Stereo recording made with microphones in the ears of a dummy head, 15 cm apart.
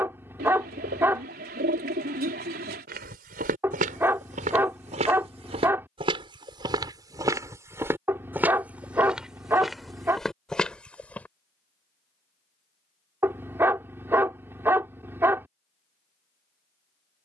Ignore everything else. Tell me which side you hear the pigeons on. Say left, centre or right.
right.